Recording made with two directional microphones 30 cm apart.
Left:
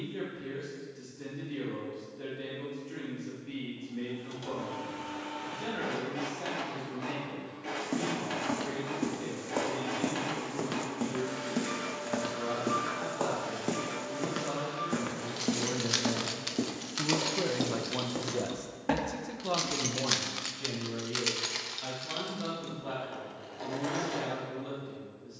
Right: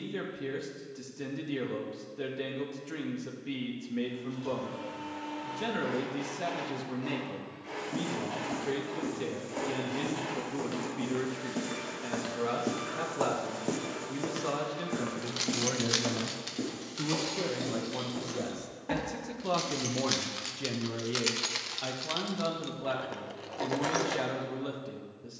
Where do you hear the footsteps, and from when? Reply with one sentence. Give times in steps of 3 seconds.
In this clip you hear the footsteps not at all from 0 s, on the left from 6 s, in the centre from 12 s, on the left from 15 s and not at all from 21 s.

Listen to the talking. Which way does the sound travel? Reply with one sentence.
In this clip you hear the talking go left and come back.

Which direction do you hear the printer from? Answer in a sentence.
In this clip you hear the printer on the left.